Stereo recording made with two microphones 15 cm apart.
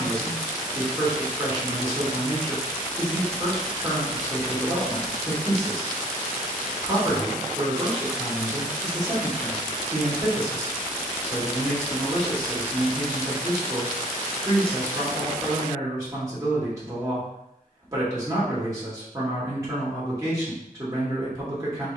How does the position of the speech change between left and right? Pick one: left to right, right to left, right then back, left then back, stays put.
stays put.